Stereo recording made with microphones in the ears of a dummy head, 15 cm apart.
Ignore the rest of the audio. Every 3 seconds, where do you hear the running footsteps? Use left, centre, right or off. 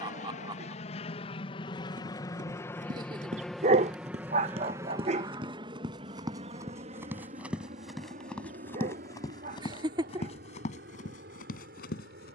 right, right, centre, left.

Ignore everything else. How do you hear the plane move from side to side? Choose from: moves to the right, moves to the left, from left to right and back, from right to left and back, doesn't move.
moves to the right.